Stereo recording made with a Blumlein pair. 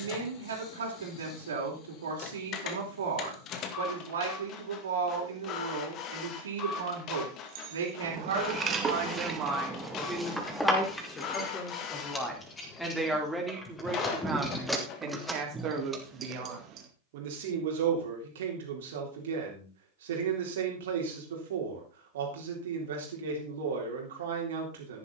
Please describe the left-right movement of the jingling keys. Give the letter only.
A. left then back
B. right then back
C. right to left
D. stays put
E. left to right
A.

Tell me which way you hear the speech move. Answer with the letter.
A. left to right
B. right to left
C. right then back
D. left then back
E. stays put
D.